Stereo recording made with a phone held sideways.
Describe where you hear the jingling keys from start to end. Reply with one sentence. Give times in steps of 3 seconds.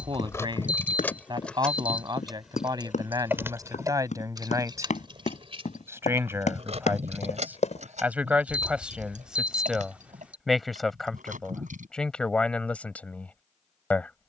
In this clip you hear the jingling keys in the centre from 0 s, on the right from 3 s and not at all from 12 s.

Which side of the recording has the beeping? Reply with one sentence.
You can hear the beeping in the centre.